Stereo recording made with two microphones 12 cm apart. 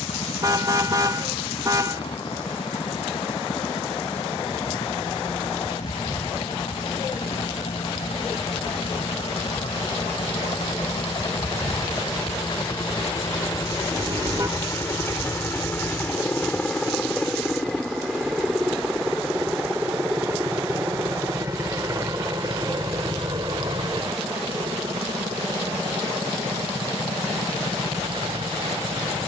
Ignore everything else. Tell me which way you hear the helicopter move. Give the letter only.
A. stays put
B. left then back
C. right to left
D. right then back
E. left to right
E.